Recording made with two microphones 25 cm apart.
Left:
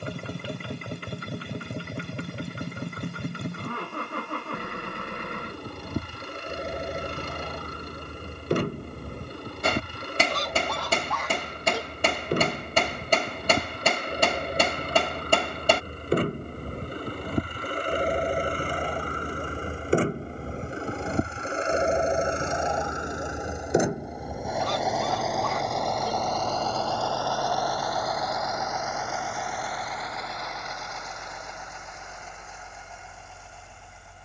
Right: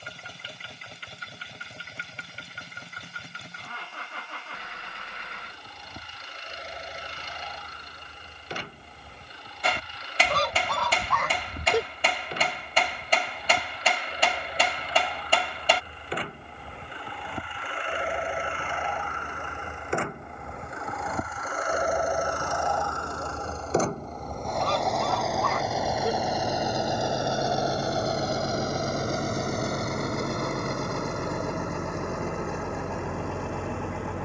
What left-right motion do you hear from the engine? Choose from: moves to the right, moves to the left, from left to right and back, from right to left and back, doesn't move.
moves to the right.